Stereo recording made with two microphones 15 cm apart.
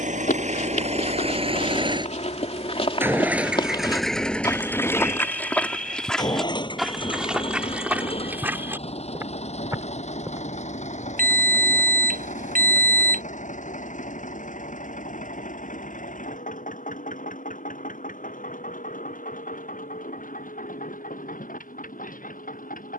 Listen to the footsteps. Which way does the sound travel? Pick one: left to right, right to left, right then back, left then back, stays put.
left to right.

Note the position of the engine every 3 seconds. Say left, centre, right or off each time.
right, centre, left, left, left, left, left, left.